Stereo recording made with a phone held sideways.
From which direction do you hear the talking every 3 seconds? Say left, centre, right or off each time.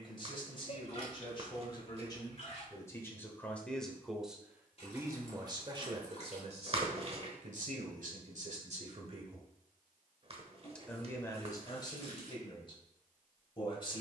left, centre, right, centre, left.